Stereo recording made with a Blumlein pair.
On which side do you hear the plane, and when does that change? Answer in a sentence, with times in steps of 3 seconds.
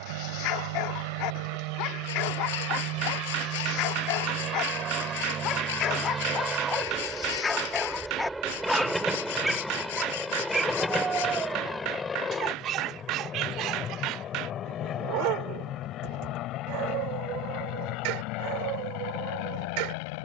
You can hear the plane on the right from 0 s, in the centre from 6 s and on the left from 12 s.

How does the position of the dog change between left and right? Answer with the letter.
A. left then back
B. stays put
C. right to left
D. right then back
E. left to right
E.